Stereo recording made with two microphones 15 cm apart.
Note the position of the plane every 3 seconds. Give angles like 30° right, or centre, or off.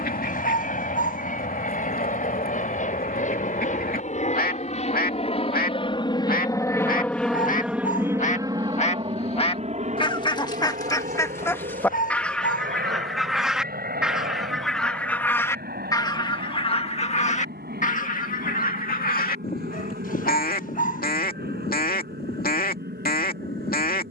70° left, 50° left, centre, 50° right, 70° right, 70° right, 80° right, 80° right.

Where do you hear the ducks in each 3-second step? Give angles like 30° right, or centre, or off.
80° left, 80° left, 60° left, 30° left, centre, 40° left, 80° left, 80° left.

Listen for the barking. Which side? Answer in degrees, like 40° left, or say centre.
70° left.